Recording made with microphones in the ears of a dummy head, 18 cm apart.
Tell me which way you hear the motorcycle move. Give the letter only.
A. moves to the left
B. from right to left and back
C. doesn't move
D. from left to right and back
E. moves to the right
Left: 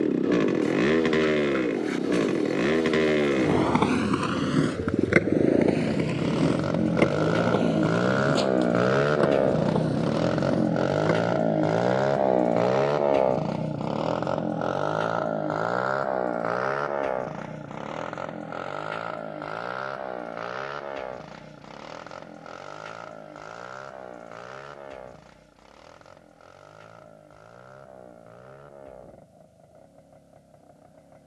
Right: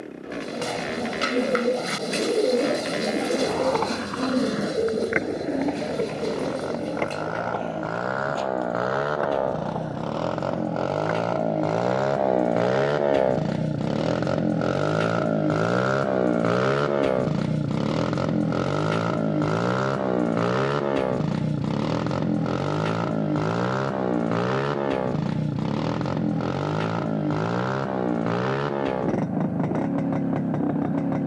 E.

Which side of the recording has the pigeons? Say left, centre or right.
right.